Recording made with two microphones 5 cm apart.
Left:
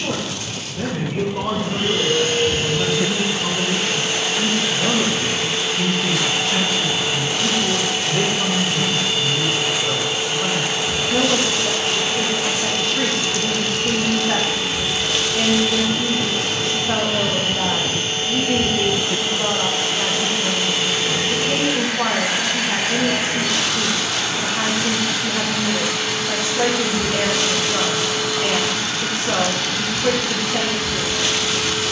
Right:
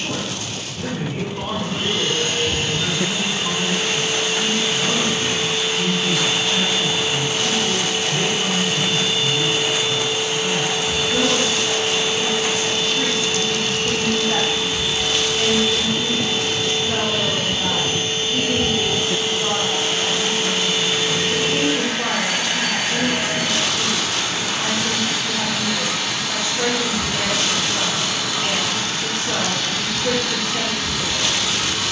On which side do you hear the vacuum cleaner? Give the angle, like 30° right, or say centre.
80° left.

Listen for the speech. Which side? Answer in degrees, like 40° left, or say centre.
90° left.